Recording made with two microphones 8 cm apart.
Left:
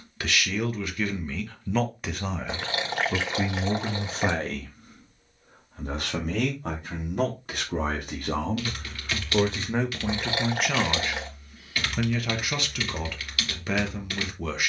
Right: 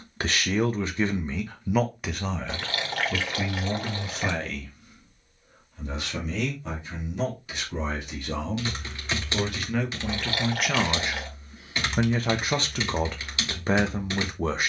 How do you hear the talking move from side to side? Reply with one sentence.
In this clip you hear the talking move from right to left and back again.